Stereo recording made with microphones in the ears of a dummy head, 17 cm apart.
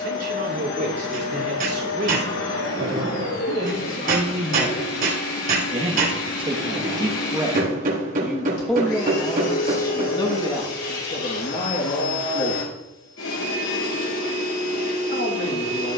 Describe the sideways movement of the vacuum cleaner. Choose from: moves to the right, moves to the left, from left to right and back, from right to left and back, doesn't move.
doesn't move.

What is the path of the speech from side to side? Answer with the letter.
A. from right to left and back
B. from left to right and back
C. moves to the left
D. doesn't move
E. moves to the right
C.